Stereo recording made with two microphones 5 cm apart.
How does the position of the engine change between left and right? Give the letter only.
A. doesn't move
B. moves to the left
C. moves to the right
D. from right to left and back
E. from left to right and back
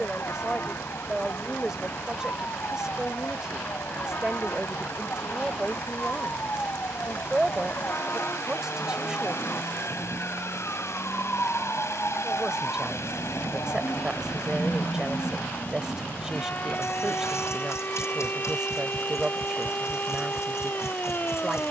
A.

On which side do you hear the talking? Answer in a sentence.
In this clip you hear the talking in the centre.